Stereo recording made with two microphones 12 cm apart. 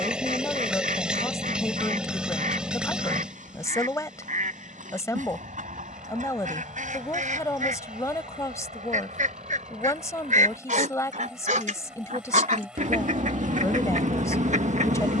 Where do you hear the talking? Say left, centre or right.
left.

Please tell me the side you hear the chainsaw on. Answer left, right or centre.
centre.